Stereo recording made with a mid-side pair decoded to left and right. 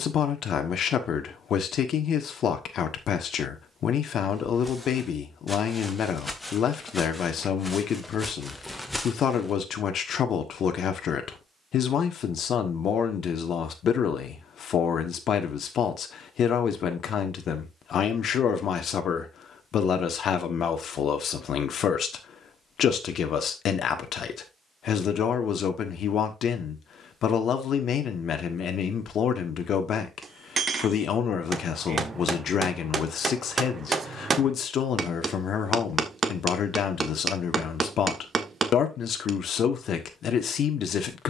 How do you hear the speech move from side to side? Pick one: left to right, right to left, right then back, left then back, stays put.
stays put.